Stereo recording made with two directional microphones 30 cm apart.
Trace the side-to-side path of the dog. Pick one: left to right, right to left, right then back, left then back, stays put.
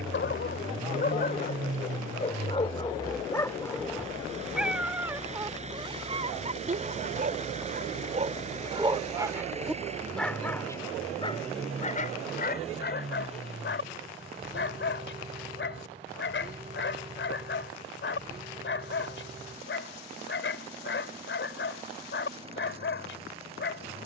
right then back.